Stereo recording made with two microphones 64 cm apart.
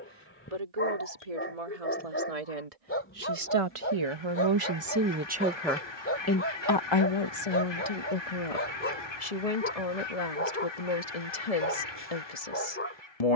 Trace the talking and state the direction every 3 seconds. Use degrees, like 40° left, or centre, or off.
70° right, 30° right, 50° left, 70° left, 70° left.